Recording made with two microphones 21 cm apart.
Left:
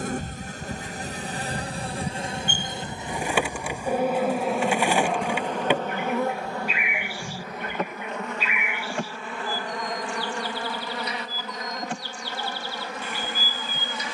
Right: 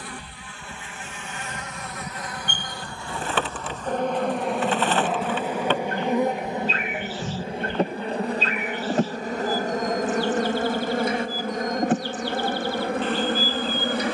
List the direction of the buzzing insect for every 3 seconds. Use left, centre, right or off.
left, centre, right, right, right.